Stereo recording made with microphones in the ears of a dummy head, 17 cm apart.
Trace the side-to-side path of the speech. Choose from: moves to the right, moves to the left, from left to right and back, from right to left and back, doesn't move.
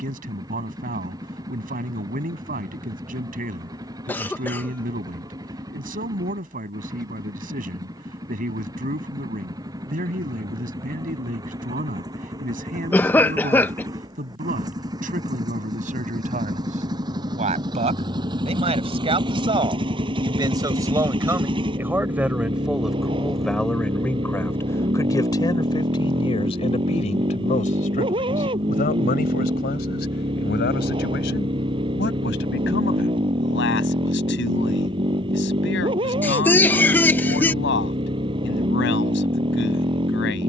moves to the left.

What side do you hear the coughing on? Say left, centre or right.
centre.